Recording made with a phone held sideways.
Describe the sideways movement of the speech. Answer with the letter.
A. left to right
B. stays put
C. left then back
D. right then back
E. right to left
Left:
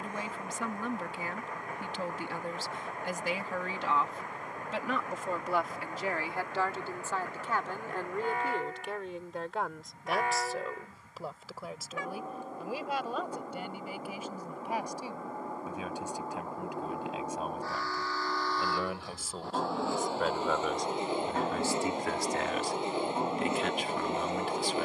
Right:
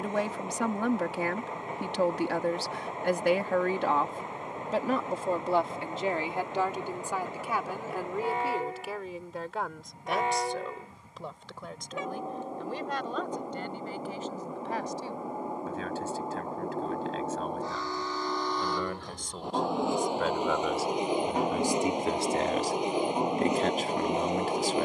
C.